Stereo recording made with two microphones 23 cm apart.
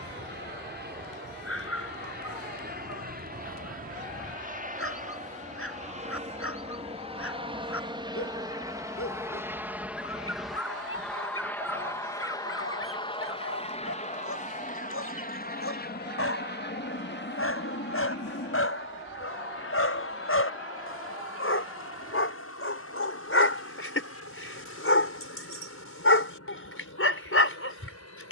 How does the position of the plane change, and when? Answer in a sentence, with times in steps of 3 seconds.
You can hear the plane on the right from 0 s, in the centre from 9 s and on the left from 12 s.